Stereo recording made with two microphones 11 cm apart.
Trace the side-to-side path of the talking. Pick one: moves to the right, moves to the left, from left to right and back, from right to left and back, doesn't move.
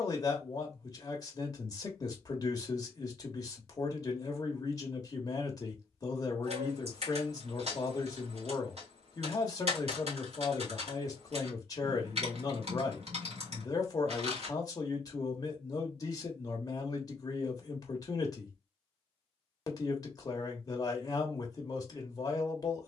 doesn't move.